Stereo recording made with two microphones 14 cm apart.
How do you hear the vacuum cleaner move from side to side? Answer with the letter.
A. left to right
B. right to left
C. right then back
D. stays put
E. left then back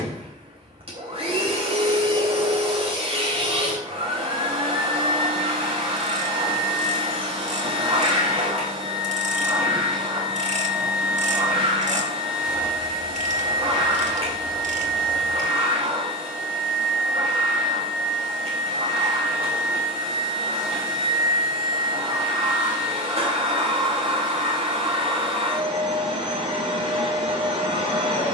D.